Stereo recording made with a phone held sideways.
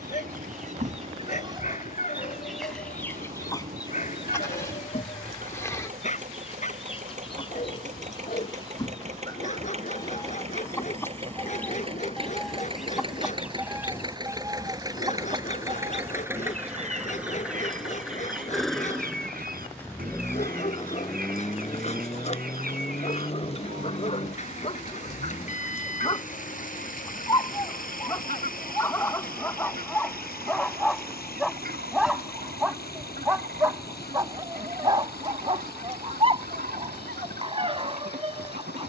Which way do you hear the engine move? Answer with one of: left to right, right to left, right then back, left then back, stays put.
right to left.